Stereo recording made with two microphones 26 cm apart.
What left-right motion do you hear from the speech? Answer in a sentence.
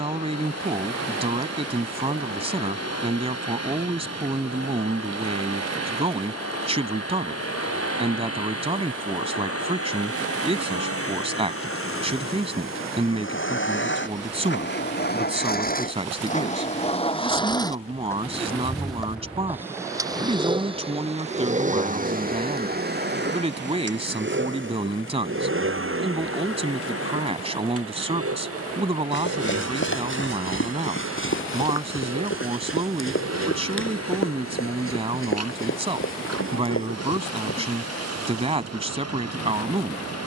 In this clip you hear the speech stay in one place.